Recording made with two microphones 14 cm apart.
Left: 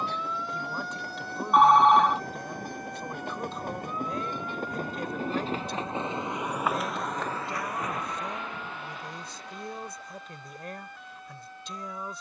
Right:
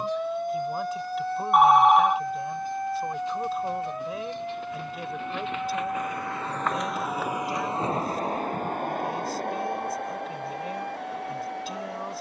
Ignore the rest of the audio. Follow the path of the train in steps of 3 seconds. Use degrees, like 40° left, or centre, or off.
70° left, 50° left, 20° right, 70° right.